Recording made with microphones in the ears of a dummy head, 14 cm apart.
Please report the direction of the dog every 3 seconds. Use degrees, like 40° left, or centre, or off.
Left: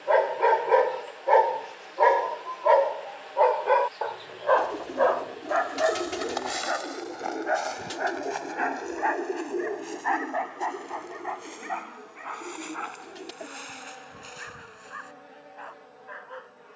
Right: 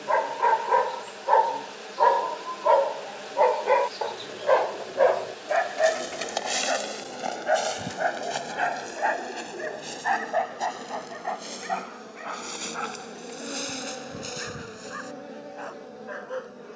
20° left, 20° right, 40° right, 50° right, 50° right, 60° right.